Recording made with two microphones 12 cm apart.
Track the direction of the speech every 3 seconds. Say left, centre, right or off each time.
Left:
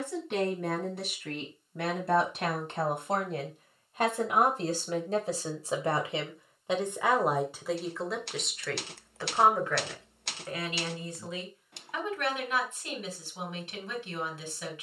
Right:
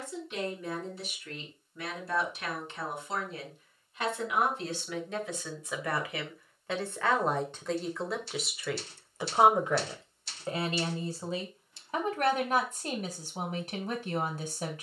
left, left, centre, right, right.